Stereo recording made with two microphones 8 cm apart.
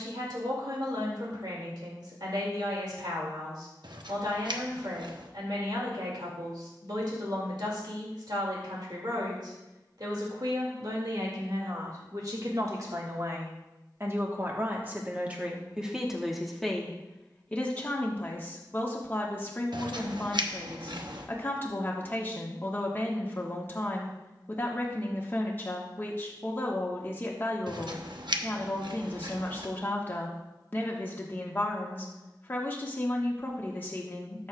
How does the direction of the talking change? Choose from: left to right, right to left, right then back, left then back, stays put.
right to left.